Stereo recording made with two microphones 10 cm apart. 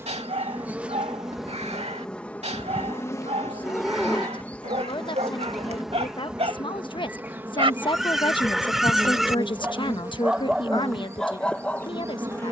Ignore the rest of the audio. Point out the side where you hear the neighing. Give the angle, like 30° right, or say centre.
centre.